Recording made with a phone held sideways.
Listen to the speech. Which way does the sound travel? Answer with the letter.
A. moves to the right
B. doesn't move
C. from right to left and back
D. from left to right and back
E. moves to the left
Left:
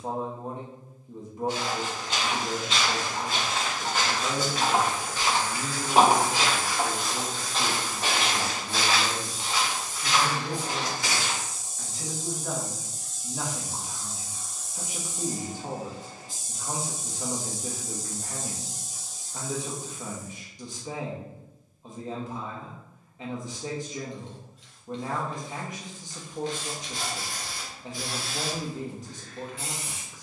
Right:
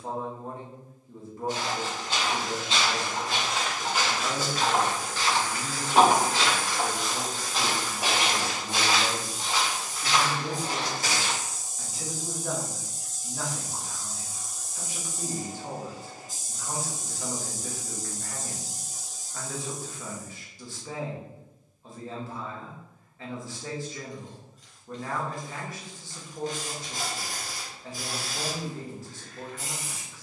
D.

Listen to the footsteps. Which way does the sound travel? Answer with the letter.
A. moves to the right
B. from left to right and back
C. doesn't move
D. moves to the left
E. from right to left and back
E.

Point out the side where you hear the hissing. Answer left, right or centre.
right.